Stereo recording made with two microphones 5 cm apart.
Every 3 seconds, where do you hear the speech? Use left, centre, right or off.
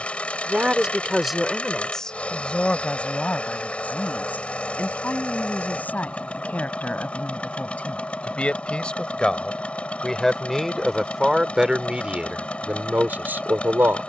centre, left, left, centre, right.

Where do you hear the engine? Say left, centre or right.
left.